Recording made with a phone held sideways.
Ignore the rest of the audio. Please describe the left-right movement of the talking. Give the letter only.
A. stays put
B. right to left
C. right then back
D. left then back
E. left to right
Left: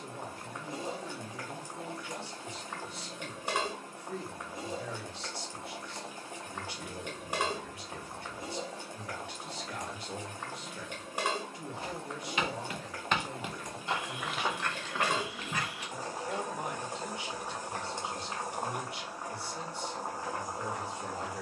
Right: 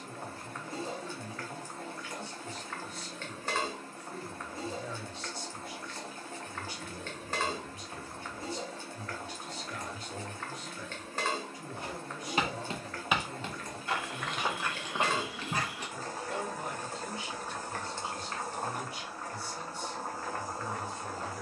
A.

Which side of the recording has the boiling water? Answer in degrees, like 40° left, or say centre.
10° left.